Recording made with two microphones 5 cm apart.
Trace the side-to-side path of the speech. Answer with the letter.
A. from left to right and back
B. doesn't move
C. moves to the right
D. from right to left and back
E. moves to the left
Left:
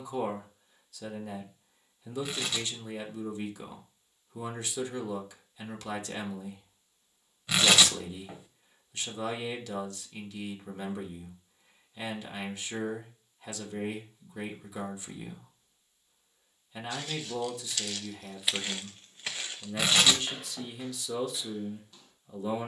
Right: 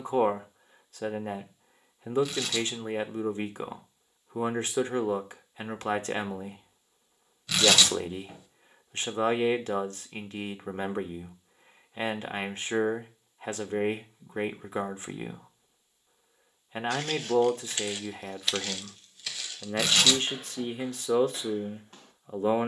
B.